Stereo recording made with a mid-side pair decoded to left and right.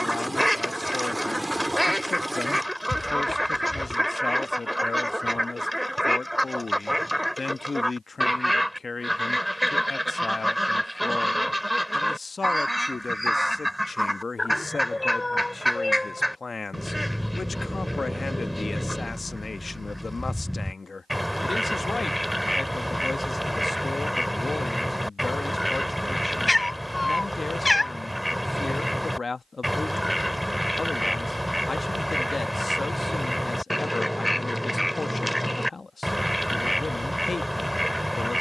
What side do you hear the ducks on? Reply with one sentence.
You can hear the ducks in the centre.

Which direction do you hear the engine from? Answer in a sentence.
You can hear the engine in the centre.